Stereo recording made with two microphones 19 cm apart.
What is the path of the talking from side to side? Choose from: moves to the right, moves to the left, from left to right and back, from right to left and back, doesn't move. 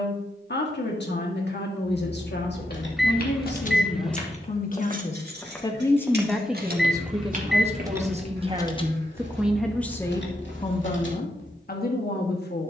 from left to right and back.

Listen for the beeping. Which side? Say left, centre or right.
centre.